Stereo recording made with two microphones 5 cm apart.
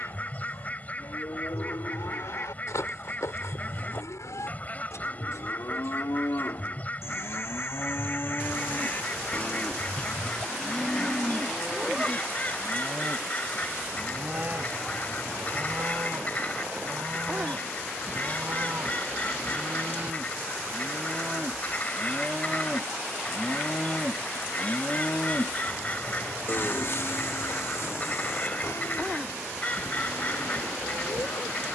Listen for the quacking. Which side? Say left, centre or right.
left.